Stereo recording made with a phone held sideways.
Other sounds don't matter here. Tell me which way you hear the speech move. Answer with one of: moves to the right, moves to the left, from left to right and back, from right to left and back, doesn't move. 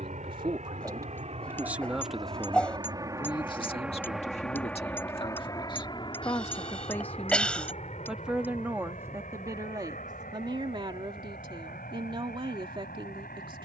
from right to left and back.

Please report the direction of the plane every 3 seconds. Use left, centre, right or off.
right, centre, left, left, left.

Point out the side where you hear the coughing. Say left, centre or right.
centre.